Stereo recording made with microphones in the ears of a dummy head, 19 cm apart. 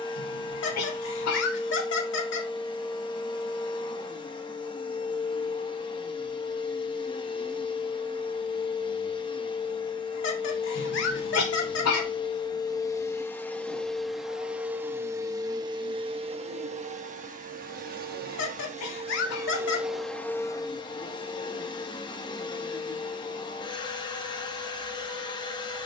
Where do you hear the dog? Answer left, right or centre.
left.